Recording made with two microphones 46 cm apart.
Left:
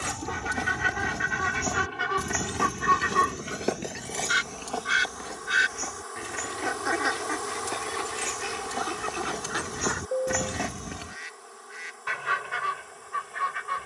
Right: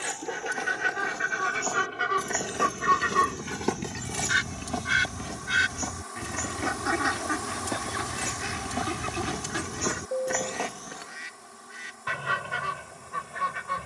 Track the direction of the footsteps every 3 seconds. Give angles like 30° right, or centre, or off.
40° left, 30° right, 60° right, 10° left, off.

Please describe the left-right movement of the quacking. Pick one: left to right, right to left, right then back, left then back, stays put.
left to right.